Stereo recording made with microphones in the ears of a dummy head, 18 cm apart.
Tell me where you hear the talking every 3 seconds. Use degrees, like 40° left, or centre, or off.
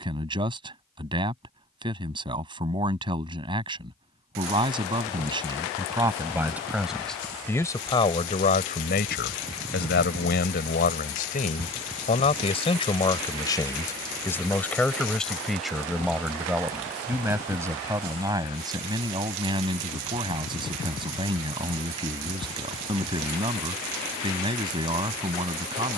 20° right, 20° right, 10° left, 50° left, 20° left, 10° right, 20° right, 20° right, 20° right.